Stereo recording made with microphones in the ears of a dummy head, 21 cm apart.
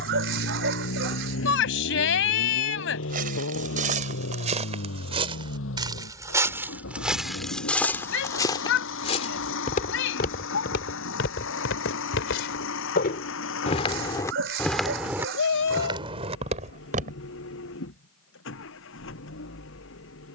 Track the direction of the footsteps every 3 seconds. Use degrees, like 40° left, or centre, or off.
off, 30° right, centre, 50° left, 30° left, 20° right, off.